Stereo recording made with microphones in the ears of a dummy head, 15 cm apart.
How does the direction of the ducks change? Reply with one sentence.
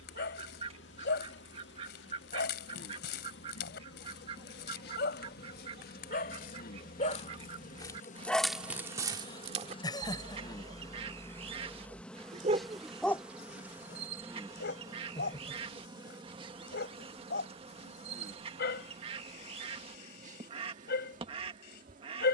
You can hear the ducks stay in one place.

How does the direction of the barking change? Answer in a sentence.
You can hear the barking move from left to right and back again.